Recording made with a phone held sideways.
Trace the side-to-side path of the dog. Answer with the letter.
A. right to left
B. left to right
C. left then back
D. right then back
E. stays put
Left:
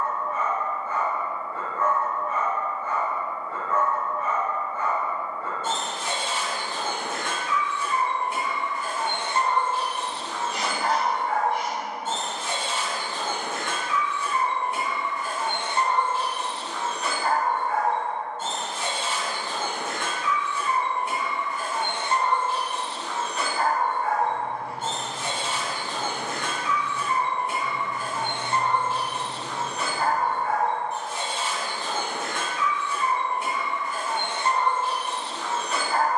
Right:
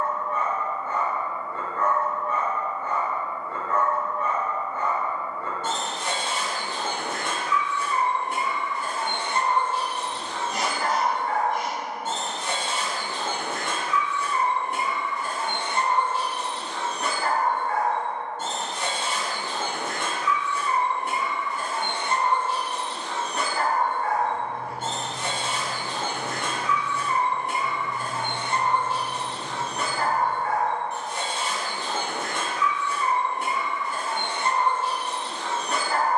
E.